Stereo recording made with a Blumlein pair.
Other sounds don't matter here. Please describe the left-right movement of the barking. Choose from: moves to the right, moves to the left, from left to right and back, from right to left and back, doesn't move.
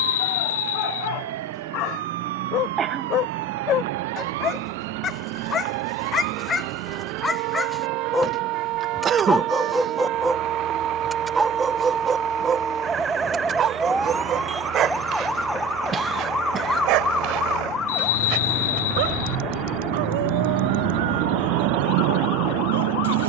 moves to the right.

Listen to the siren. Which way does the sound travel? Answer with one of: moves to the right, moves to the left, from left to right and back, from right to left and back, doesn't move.
moves to the left.